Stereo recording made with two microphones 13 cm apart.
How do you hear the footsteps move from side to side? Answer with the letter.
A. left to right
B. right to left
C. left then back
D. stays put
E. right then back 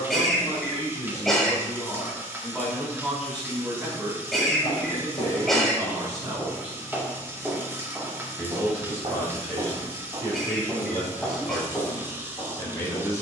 E.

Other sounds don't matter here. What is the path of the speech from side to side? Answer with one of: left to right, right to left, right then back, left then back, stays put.
right then back.